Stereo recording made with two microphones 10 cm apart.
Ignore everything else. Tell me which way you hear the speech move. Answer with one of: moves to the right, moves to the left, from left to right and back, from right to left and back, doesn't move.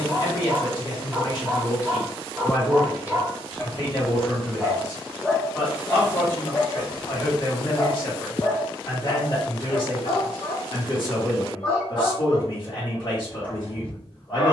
doesn't move.